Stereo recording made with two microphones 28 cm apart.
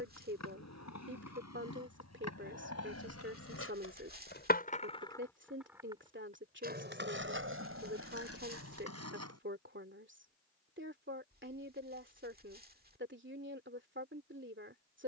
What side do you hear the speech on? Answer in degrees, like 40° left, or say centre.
40° right.